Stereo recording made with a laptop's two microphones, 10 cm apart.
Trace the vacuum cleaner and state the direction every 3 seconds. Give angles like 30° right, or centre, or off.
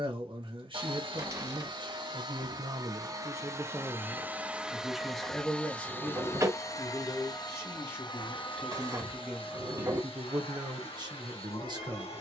50° right, 10° right, 40° left, 60° left.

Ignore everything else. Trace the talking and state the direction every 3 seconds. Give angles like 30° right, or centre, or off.
50° right, 10° right, 20° left, 30° right.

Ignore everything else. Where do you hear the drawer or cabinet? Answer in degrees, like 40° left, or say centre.
30° right.